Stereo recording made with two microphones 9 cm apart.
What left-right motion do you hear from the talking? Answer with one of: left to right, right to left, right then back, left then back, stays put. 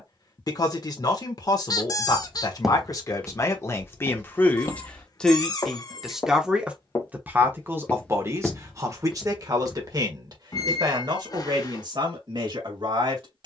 left to right.